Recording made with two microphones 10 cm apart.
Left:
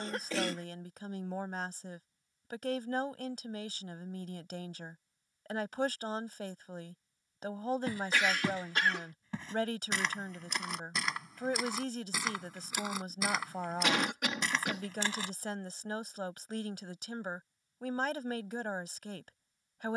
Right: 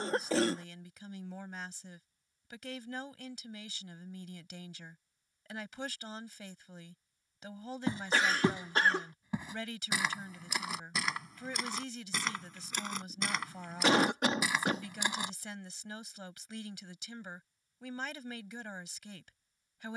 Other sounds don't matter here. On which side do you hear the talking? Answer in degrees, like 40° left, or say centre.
50° left.